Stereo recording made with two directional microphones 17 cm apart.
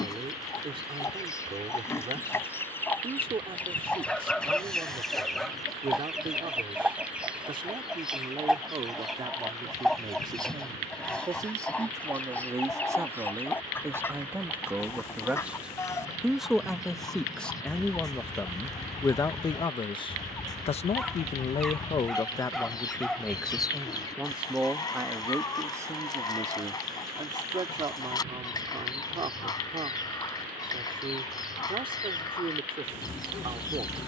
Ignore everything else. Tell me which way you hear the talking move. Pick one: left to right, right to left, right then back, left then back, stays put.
left then back.